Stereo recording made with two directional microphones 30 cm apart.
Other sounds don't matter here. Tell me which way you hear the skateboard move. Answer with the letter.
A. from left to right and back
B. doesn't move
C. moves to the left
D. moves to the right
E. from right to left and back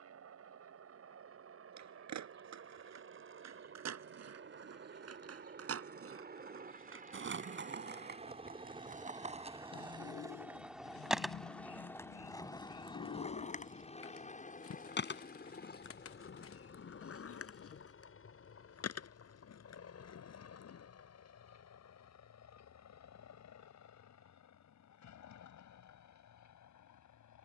C.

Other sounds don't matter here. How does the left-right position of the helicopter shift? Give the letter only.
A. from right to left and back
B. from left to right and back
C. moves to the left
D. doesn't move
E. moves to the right
C.